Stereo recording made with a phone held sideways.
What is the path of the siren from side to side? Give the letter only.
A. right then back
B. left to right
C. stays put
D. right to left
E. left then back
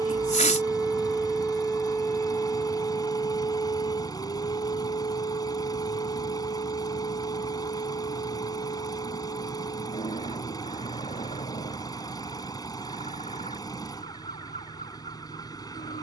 D.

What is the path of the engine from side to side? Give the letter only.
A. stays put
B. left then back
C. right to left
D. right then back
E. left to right
A.